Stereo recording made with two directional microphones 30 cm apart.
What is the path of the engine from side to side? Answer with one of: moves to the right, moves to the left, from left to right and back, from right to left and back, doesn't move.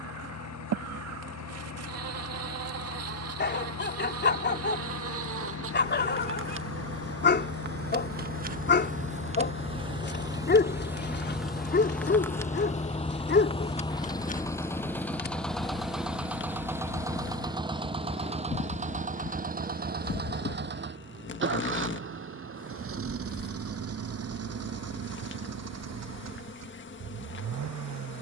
moves to the right.